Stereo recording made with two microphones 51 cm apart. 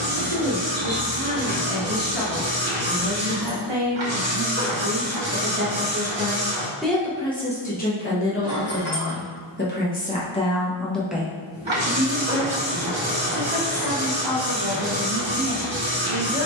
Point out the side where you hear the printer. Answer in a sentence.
In this clip you hear the printer on the right.